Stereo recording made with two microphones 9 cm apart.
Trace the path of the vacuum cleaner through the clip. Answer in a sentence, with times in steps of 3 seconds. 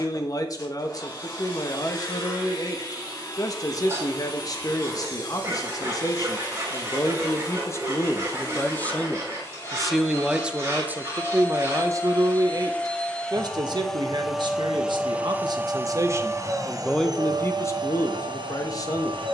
You can hear the vacuum cleaner on the left from 0 s, in the centre from 12 s and on the right from 15 s.